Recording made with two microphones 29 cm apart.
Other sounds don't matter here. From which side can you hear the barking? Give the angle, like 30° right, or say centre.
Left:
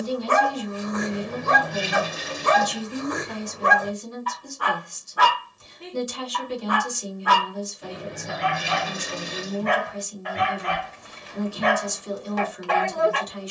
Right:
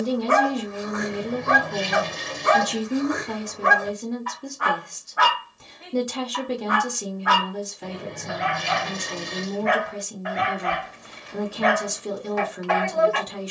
40° left.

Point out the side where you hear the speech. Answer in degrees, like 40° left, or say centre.
70° right.